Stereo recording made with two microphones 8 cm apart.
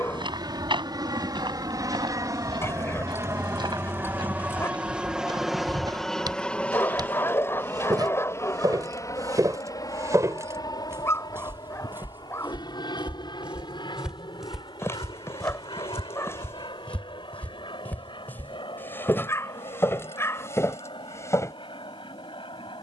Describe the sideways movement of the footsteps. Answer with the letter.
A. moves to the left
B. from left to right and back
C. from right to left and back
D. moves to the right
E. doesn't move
A.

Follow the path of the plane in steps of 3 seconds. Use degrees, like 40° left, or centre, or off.
50° right, 20° right, 20° left, 50° left, 60° left, 60° left, 70° left, 70° left.